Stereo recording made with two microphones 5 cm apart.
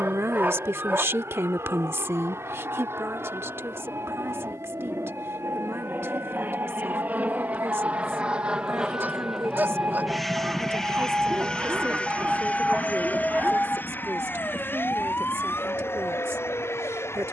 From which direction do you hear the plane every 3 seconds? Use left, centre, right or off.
right, right, right, centre, left, left.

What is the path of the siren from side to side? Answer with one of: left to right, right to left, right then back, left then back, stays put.
right to left.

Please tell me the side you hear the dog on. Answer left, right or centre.
right.